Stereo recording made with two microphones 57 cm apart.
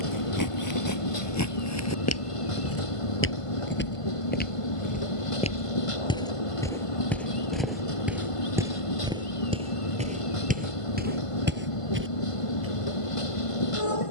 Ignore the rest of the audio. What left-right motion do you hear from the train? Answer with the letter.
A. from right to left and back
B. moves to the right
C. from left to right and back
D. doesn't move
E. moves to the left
D.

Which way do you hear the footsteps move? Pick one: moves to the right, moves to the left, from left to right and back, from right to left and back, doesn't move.
moves to the right.